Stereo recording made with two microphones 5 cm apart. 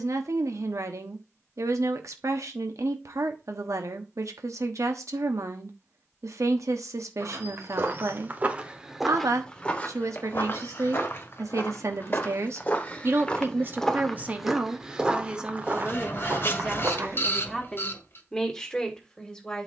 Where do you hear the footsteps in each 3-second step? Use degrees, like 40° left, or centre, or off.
off, off, 40° right, 40° left, 20° left, 40° right, off.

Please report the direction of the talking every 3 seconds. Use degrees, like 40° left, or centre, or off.
80° right, 80° right, 80° right, 70° right, 40° right, 10° right, 10° left.